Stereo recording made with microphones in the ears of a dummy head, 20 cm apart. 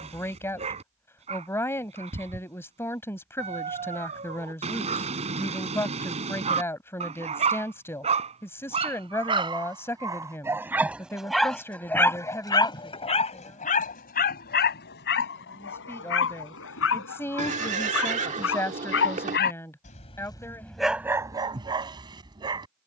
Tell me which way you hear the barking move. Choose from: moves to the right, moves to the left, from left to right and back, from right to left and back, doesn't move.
from right to left and back.